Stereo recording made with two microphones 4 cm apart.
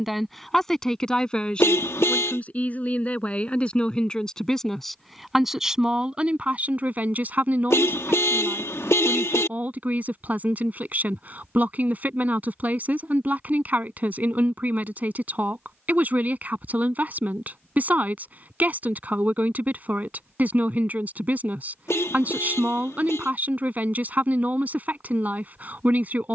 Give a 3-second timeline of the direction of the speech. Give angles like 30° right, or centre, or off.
20° left, 10° left, 30° right, 40° right, 40° right, 40° right, 40° right, 40° right, 40° right.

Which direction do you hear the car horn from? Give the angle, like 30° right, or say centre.
70° left.